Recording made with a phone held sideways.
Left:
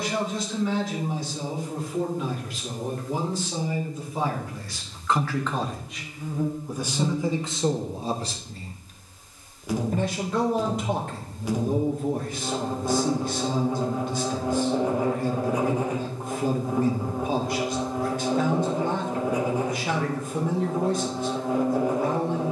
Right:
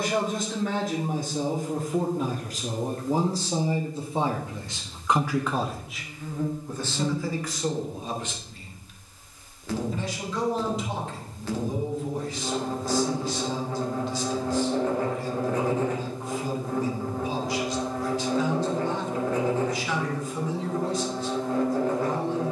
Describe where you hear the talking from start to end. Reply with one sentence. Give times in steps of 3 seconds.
You can hear the talking on the right from 0 s and on the left from 6 s.